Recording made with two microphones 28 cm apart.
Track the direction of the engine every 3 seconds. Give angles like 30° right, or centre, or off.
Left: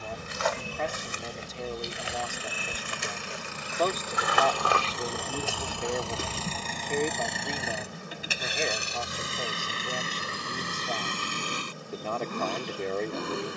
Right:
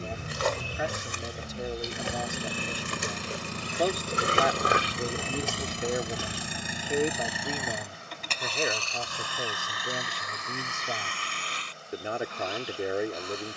50° right, 30° right, centre, 40° left, 60° left.